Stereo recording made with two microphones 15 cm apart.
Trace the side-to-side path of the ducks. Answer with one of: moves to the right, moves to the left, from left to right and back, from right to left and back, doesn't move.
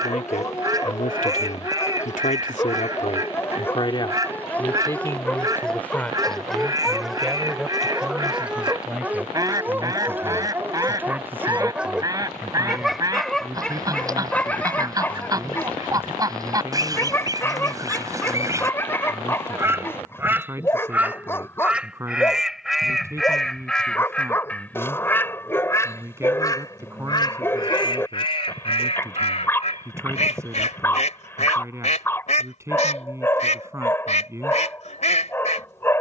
moves to the left.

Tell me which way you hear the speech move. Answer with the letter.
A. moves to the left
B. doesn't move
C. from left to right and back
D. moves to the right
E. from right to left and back
D.